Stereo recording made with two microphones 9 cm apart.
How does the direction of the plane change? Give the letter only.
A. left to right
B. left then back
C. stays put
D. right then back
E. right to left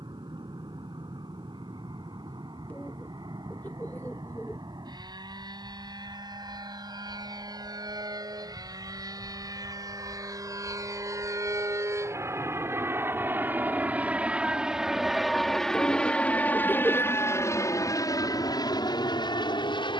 E.